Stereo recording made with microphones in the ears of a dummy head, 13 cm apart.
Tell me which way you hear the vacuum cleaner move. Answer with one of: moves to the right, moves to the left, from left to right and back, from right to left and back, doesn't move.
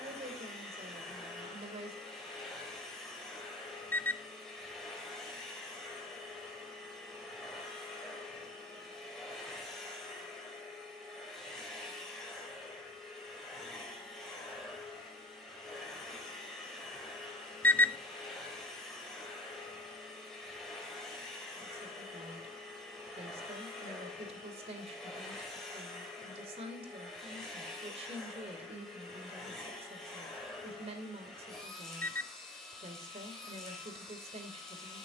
doesn't move.